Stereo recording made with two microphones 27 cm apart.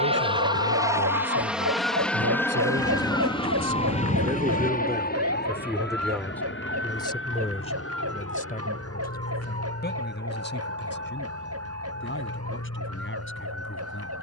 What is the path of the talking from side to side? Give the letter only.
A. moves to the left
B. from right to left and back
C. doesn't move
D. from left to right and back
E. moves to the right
A.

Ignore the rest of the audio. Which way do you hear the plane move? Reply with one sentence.
In this clip you hear the plane go from the right side to the left.